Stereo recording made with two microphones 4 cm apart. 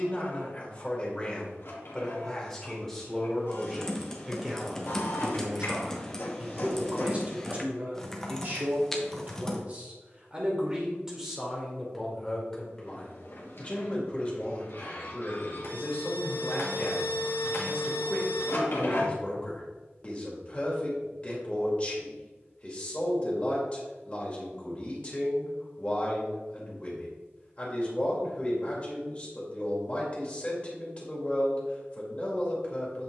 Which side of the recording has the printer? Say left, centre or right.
left.